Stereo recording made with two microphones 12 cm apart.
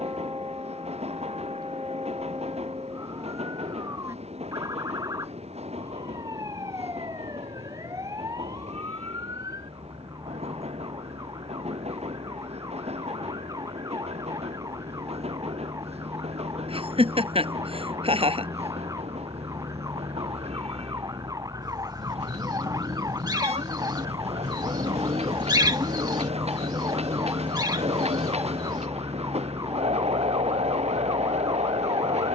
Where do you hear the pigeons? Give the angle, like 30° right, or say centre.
40° right.